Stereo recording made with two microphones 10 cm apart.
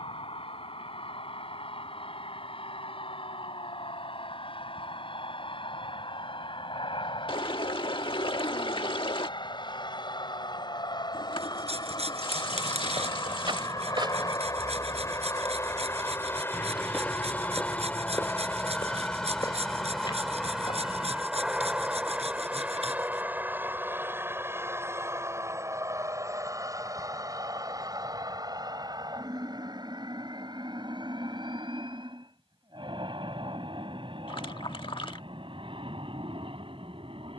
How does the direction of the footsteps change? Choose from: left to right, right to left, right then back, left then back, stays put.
right to left.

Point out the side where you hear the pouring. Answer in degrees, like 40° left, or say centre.
60° left.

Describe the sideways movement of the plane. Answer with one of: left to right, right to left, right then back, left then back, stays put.
left to right.